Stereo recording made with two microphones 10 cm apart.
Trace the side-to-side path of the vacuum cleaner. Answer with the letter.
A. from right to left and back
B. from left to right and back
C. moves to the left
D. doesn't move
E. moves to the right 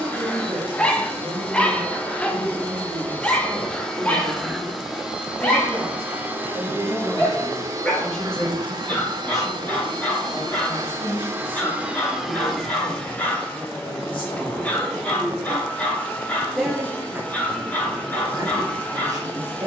B.